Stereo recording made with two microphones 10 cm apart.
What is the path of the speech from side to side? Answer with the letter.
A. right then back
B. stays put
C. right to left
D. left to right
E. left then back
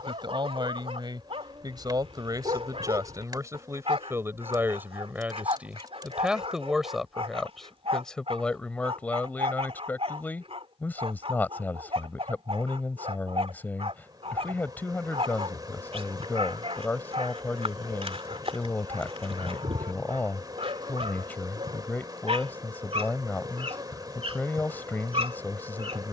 C.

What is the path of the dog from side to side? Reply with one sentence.
In this clip you hear the dog stay in one place.